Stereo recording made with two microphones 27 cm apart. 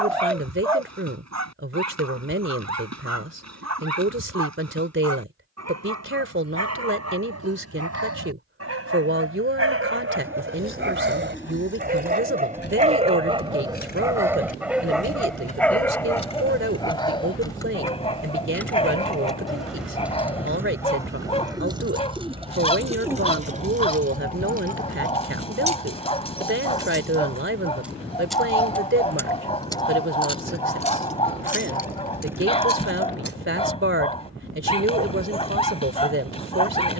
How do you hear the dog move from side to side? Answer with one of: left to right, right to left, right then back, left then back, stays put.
right to left.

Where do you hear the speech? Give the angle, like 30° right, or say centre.
50° right.